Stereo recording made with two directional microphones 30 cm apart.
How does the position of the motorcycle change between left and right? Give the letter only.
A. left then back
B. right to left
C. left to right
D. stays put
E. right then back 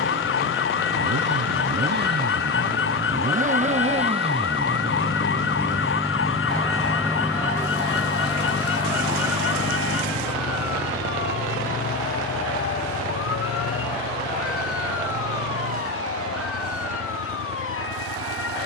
B.